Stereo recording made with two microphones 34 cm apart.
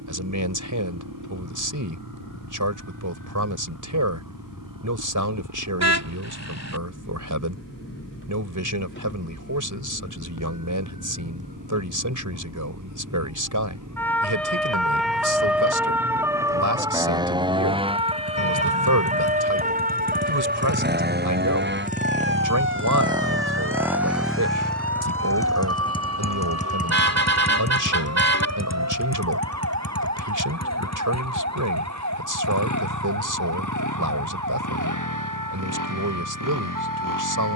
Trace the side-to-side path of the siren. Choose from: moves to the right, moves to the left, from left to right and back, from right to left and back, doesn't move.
moves to the right.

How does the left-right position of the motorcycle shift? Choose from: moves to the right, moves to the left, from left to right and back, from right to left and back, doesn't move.
moves to the left.